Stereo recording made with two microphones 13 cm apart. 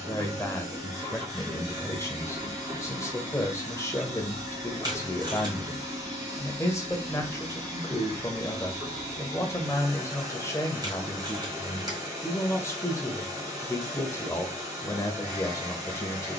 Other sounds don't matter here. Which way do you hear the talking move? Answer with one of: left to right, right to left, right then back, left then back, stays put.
stays put.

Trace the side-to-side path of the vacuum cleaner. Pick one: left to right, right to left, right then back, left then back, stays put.
stays put.